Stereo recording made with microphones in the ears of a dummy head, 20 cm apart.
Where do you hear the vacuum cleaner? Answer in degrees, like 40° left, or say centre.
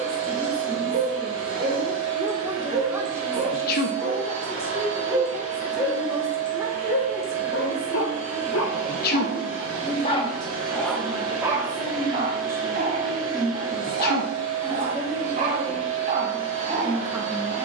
80° right.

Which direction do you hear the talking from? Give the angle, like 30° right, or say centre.
10° right.